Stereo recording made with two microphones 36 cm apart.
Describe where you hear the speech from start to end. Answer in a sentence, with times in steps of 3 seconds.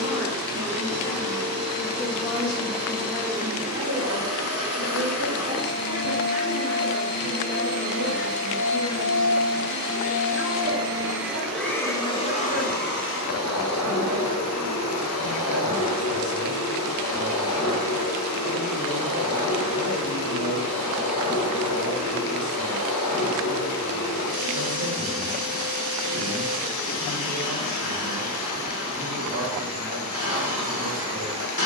You can hear the speech on the left from 0 s and on the right from 3 s.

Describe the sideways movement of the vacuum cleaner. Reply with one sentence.
You can hear the vacuum cleaner move from right to left.